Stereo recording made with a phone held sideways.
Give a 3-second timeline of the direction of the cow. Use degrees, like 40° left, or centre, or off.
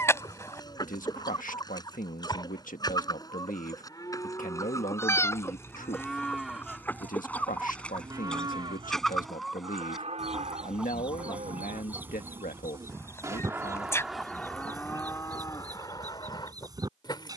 30° left, 20° left, 20° right, 60° right, 20° right, 30° left.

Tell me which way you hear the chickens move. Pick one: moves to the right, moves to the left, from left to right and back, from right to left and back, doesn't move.
moves to the right.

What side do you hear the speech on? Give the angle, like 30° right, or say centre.
80° left.